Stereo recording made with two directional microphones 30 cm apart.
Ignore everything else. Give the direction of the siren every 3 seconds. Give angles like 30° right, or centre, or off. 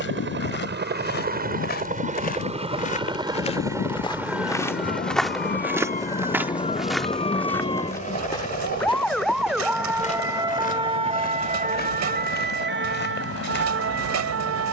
50° left, 40° left, 20° left, 10° right, 40° right.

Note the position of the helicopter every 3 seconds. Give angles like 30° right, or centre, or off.
30° right, centre, 20° left, 40° left, 50° left.